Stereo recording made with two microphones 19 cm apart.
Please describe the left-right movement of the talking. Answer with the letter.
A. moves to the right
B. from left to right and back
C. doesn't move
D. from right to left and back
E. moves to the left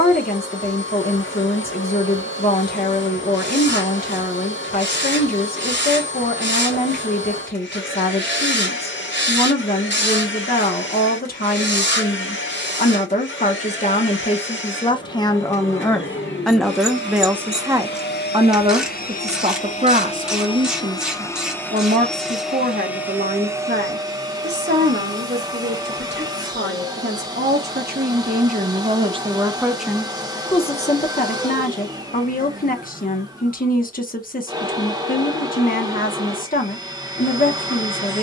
B.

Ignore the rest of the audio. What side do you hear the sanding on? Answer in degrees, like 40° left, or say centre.
70° right.